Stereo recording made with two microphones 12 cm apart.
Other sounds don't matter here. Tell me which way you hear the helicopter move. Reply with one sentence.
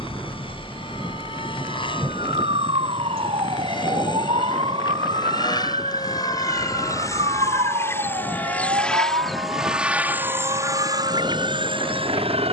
In this clip you hear the helicopter move from left to right.